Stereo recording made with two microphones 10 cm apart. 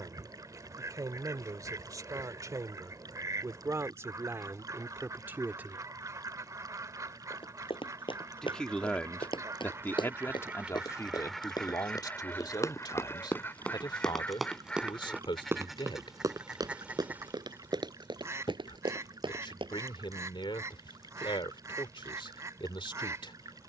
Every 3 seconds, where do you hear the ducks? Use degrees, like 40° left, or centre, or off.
40° right, 40° right, 40° right, 10° right, 20° left, 10° right, 30° right, 30° right.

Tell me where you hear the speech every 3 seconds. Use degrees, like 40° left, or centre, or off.
40° right, 30° right, 10° left, 30° left, 50° left, 60° left, 60° left, 60° left.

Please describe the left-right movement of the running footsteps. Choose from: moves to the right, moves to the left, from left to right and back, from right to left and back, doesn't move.
moves to the right.